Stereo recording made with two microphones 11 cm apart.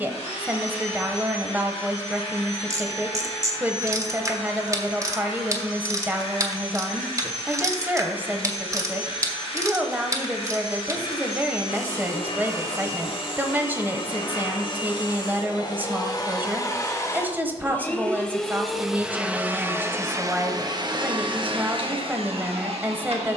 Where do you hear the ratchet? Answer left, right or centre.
right.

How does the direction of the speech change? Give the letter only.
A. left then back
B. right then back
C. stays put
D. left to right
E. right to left
C.